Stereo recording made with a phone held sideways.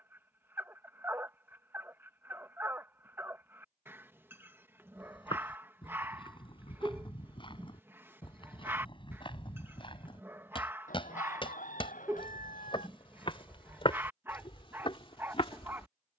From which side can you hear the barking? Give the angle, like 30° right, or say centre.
20° right.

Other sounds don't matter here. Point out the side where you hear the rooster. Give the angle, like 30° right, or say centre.
80° left.